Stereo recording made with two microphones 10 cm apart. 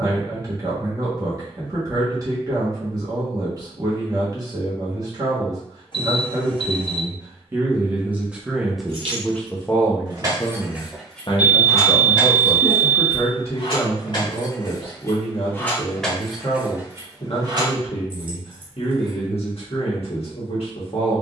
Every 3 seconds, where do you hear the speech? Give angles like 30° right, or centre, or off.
40° right, 40° right, 20° right, 30° left, 70° left, 70° left, 70° left.